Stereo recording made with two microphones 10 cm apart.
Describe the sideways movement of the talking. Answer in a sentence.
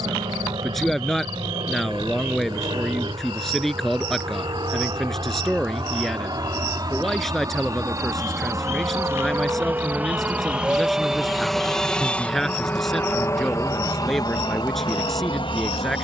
You can hear the talking stay put.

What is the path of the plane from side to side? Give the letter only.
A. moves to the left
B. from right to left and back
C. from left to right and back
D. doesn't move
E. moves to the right
A.